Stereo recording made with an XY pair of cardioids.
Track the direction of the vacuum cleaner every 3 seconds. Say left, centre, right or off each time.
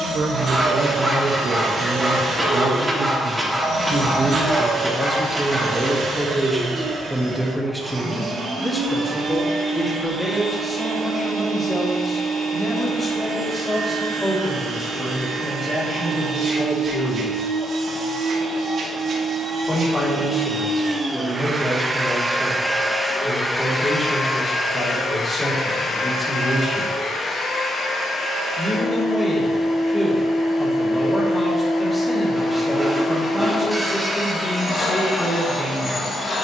right, right, right, right, right, right, right, centre, left, left, left, left.